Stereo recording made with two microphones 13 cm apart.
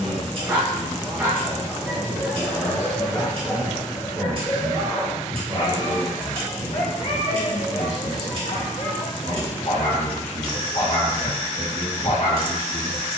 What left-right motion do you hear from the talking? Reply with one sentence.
You can hear the talking move from right to left.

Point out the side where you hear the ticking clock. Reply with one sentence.
You can hear the ticking clock on the right.